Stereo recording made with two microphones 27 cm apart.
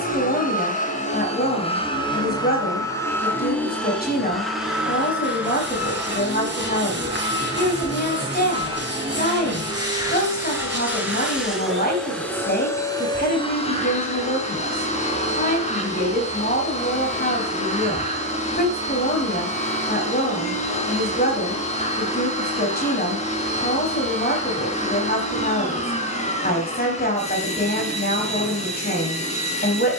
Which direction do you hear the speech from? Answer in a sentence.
You can hear the speech on the left.